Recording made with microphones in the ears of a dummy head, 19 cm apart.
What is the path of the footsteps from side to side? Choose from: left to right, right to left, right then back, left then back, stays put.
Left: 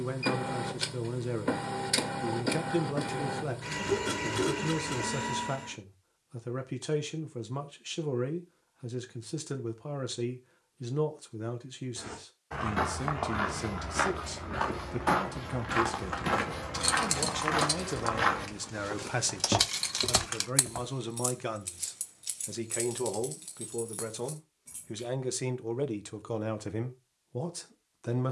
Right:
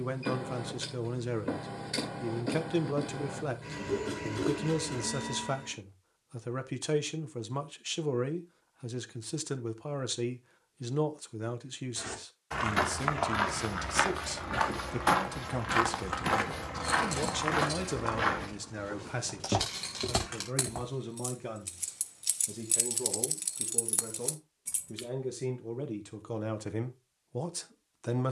right to left.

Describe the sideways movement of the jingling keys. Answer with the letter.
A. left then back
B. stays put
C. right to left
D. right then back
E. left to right
E.